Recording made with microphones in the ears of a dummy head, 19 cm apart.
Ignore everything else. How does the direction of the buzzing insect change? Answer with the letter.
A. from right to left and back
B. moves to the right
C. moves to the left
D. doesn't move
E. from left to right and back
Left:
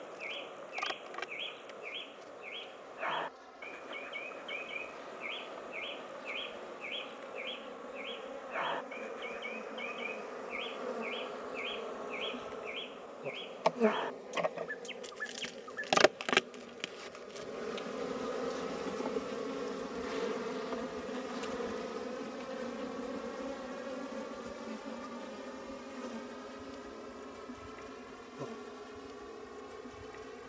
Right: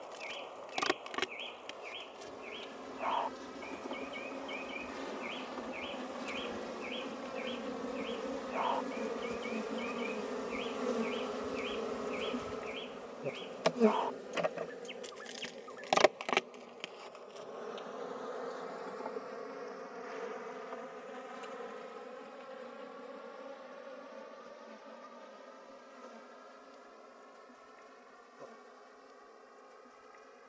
C.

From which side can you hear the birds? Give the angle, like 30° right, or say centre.
20° left.